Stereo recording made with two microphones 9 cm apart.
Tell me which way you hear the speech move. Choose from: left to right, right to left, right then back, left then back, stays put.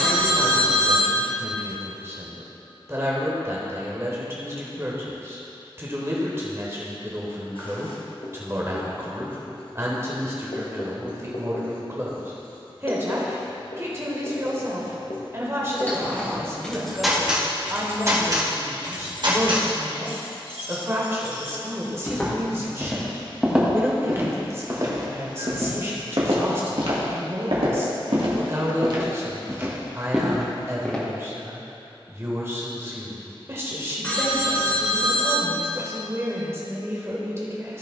stays put.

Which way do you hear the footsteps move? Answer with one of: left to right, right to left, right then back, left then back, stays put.
right then back.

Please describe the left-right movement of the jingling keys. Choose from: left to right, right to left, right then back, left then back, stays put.
left to right.